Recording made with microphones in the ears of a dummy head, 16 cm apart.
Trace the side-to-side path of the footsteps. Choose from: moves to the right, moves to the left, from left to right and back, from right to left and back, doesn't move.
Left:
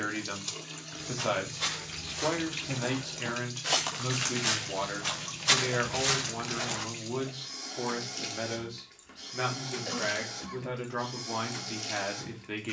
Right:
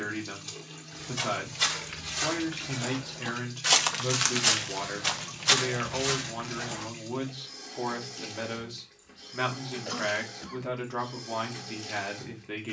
moves to the left.